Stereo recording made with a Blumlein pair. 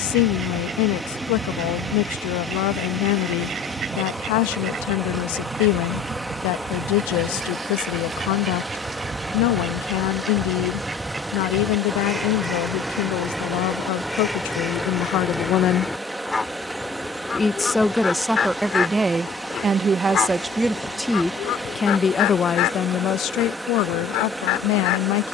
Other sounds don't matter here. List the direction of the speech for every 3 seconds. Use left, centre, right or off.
left, left, left, left, left, left, centre, left, left.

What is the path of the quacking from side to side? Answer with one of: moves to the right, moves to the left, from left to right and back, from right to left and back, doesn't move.
moves to the left.